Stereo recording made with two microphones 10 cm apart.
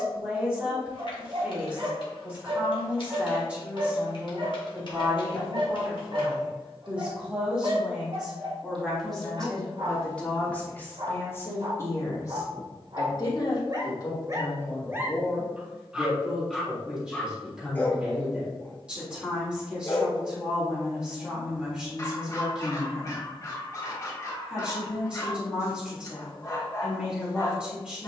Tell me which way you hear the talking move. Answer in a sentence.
In this clip you hear the talking go left and come back.